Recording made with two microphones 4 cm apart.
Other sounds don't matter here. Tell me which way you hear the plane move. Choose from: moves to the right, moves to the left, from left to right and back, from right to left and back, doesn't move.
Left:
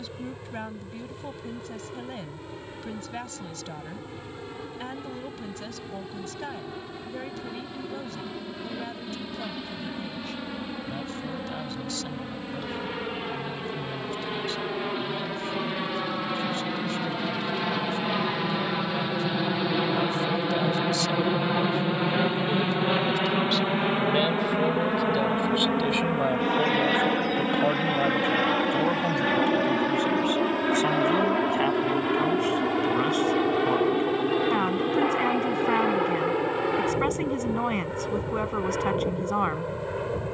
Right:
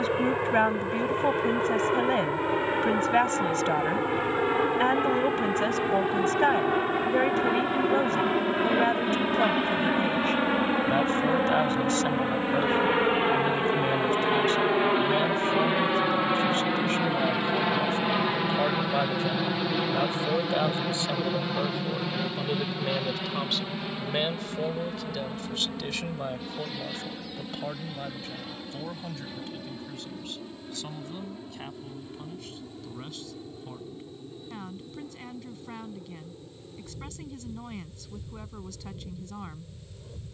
moves to the left.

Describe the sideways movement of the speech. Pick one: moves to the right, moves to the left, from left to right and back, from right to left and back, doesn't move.
moves to the left.